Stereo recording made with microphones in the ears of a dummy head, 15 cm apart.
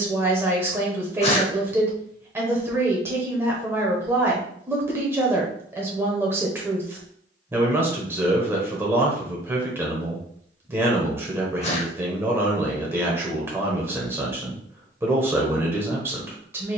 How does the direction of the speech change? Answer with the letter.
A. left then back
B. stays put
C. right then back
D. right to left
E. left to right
B.